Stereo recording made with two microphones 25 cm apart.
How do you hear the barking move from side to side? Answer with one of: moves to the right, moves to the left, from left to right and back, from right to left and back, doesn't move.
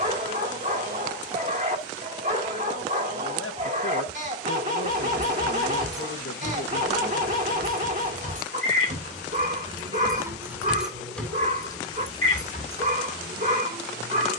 doesn't move.